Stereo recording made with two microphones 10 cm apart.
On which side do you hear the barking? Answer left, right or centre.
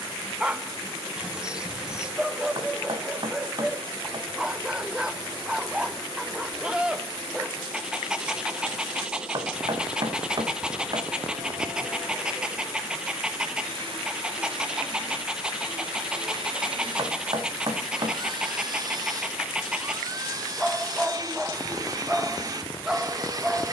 centre.